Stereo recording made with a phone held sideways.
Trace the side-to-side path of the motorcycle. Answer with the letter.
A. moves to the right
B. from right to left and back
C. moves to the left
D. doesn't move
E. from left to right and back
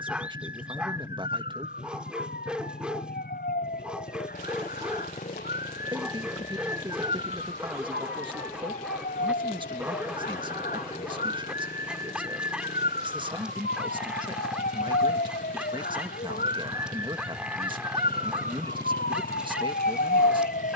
D.